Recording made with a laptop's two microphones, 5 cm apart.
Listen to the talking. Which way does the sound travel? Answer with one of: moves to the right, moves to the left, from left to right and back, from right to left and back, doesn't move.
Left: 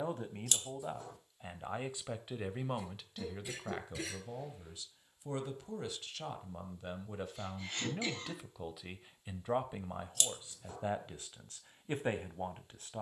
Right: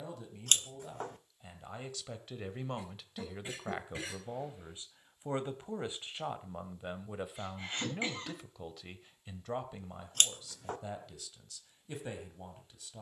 from left to right and back.